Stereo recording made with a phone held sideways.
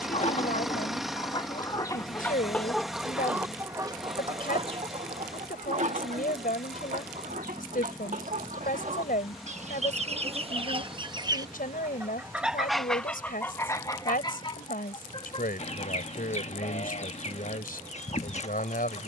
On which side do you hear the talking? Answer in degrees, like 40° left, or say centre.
70° left.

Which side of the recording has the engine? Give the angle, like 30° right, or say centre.
centre.